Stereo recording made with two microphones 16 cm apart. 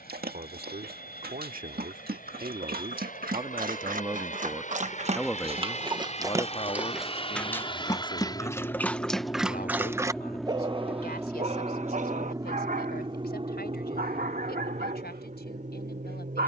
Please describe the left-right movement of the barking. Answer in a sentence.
In this clip you hear the barking go left and come back.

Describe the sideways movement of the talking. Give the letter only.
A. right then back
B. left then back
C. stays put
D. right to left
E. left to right
D.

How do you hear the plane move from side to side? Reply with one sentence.
In this clip you hear the plane go from the left side to the right.